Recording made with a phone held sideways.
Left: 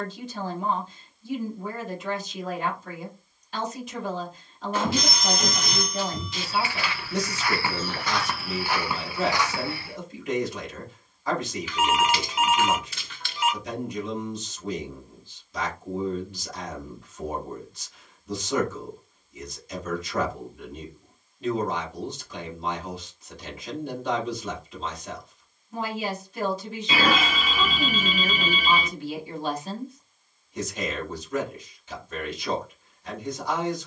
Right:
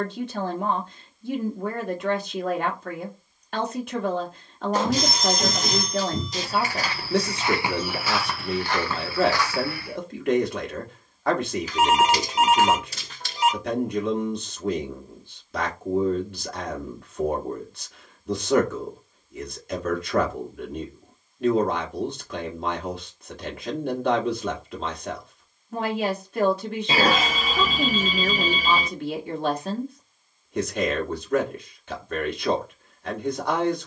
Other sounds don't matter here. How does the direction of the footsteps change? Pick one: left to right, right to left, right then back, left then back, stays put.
right then back.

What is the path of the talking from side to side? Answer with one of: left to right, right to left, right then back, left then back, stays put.
stays put.